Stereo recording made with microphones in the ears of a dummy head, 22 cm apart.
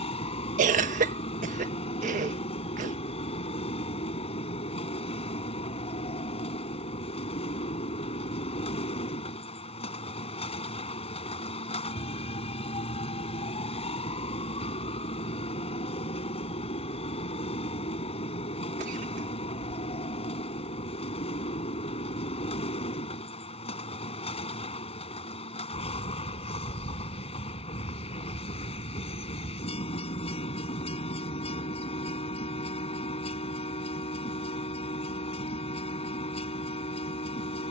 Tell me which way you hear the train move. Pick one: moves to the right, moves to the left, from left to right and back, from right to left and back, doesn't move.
doesn't move.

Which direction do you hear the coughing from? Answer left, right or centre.
right.